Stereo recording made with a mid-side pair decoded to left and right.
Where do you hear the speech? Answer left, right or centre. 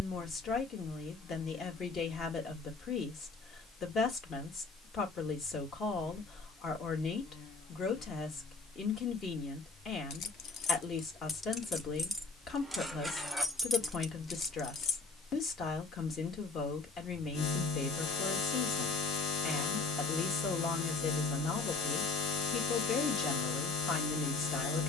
left.